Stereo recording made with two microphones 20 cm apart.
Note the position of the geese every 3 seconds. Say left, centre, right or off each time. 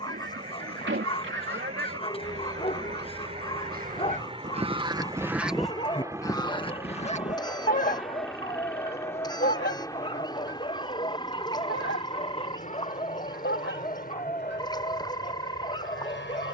right, right, left, left, left, left.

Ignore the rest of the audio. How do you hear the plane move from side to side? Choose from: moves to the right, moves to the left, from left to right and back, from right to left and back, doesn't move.
moves to the left.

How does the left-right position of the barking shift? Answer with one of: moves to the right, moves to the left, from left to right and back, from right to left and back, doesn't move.
doesn't move.